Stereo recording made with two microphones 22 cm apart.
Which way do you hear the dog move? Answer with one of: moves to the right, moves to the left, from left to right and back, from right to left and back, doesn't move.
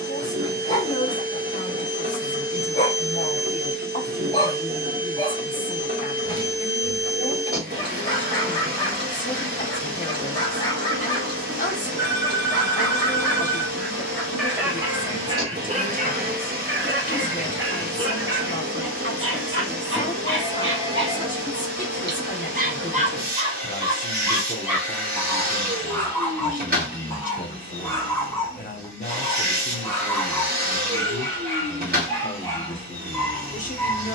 from left to right and back.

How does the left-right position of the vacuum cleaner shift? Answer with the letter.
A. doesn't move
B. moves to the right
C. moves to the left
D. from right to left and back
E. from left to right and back
A.